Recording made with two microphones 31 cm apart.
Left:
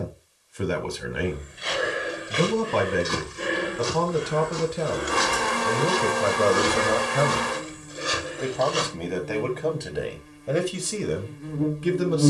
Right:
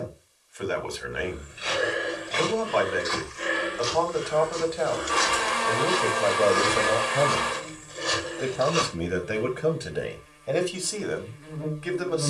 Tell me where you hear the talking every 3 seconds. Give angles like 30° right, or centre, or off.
50° left, 40° left, 10° left, 10° left.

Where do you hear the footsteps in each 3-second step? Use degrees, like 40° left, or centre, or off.
10° left, 60° left, 20° left, off.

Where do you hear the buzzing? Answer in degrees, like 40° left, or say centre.
50° left.